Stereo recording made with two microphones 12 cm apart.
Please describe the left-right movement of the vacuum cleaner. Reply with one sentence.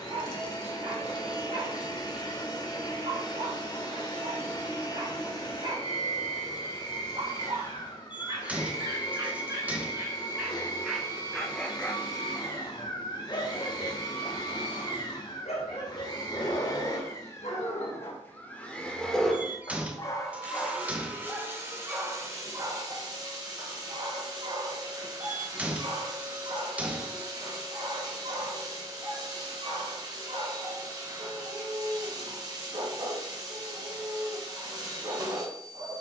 You can hear the vacuum cleaner go from the left side to the right.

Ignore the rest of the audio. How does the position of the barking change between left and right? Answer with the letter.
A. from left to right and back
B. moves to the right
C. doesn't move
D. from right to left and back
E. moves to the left
D.